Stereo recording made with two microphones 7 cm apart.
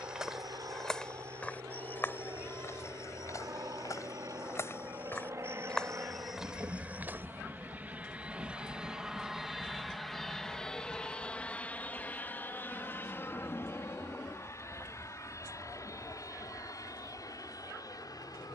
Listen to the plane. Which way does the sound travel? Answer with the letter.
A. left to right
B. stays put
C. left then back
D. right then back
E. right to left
E.